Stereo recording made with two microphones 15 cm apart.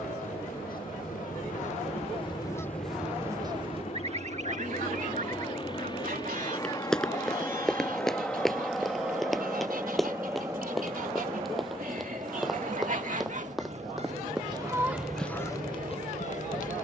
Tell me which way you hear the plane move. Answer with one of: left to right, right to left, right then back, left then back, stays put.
left to right.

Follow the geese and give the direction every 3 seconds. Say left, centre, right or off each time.
left, right, right, right, right, left.